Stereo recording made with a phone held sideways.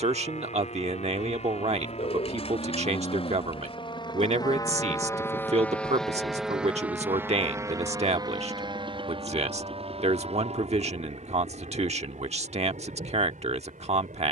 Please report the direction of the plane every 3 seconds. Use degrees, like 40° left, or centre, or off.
60° left, 30° left, 20° right, 50° right, 60° right.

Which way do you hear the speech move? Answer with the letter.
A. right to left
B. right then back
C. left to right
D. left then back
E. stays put
E.